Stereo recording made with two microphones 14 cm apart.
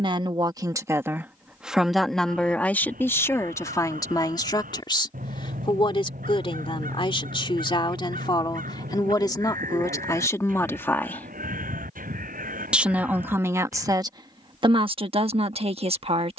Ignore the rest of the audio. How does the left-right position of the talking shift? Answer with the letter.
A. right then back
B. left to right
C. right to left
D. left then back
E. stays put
D.